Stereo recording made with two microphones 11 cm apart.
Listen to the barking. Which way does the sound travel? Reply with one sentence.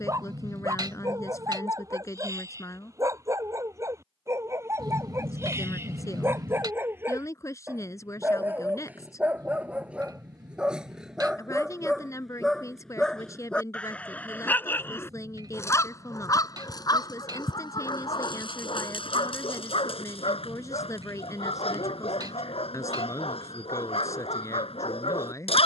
You can hear the barking go from the right side to the left.